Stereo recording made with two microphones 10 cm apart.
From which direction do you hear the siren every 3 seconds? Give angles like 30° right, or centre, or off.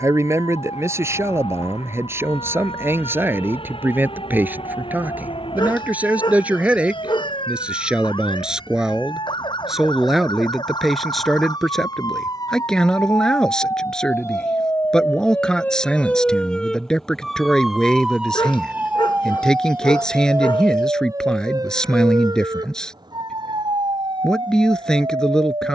70° left, 60° left, 60° left, 50° left, 30° left, 10° left, 20° right, 40° right, 50° right.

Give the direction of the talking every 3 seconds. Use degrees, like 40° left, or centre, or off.
30° right, 20° right, 10° right, centre, 10° left, 10° left, 10° left, 10° left, 10° left.